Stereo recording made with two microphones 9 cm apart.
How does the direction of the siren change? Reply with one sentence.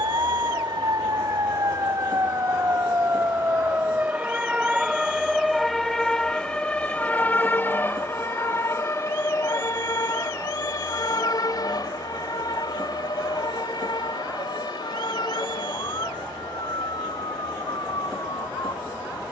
You can hear the siren move from right to left.